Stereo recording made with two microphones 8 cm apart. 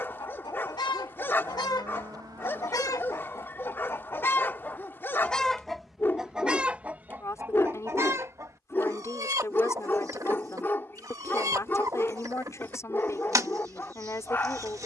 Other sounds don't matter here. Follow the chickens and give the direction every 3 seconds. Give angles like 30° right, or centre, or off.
60° left, 20° left, 20° right, 40° right, 40° right.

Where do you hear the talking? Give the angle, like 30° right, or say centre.
40° left.